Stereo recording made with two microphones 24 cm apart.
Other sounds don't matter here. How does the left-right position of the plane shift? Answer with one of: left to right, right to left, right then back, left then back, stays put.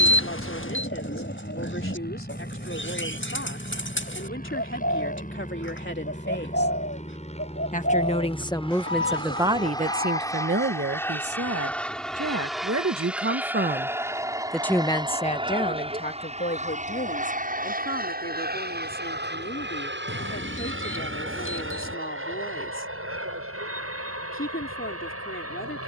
left to right.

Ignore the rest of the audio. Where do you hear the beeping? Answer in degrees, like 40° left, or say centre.
60° left.